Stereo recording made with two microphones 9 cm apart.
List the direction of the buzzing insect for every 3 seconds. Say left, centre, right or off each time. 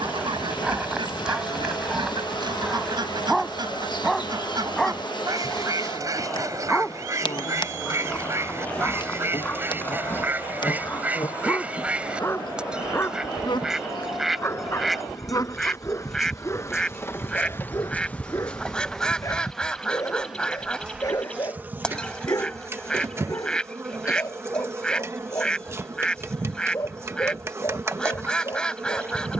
left, left, left, left, left, left, centre, right, right, right.